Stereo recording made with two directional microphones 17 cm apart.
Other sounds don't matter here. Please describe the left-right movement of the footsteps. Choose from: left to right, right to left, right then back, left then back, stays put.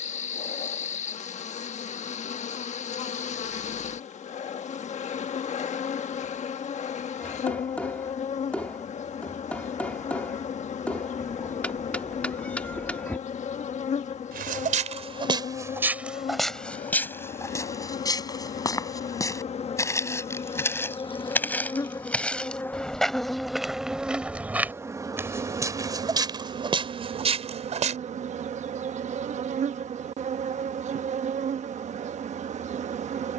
left then back.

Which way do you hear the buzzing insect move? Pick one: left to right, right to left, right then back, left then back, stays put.
left to right.